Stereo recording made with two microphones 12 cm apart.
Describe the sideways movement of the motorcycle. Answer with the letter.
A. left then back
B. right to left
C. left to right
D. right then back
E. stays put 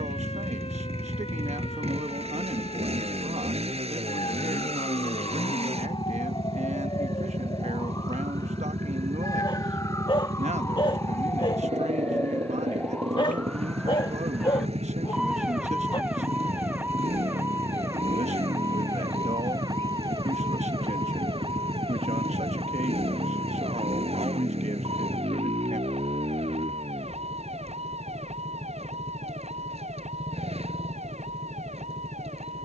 E.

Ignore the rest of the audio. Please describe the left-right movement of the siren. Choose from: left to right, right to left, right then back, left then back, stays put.
left to right.